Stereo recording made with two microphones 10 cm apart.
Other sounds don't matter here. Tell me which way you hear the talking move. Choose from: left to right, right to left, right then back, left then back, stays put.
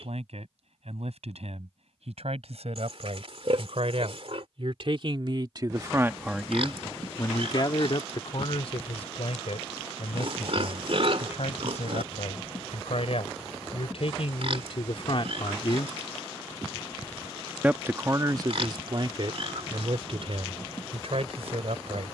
left then back.